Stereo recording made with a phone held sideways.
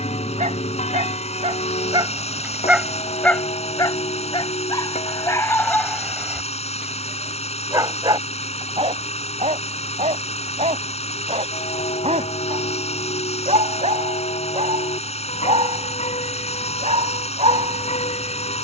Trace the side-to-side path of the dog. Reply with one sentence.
You can hear the dog move from right to left and back again.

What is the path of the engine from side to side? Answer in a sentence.
You can hear the engine stay put.